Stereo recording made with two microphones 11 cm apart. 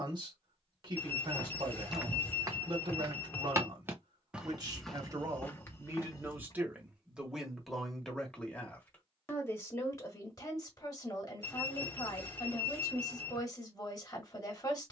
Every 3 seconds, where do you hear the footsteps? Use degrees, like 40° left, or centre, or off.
10° right, centre, 30° left, off, off.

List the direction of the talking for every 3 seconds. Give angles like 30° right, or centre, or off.
50° right, 40° right, centre, 30° left, 30° left.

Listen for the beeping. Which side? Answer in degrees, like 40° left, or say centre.
20° left.